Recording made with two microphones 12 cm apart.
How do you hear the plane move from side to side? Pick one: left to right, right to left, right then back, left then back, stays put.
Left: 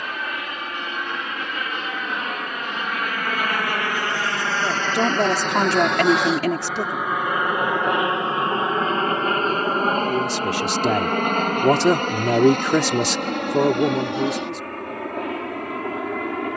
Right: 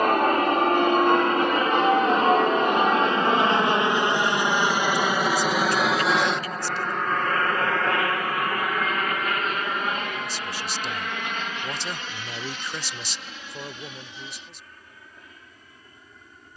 right to left.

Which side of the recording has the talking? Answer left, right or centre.
left.